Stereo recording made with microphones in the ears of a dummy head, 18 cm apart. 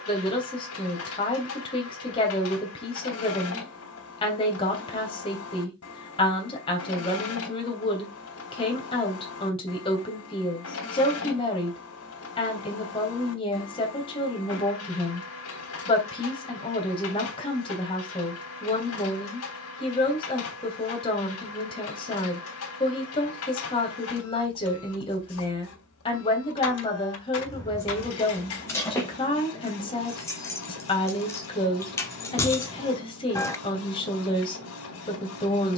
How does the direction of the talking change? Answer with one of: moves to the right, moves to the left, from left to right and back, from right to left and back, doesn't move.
doesn't move.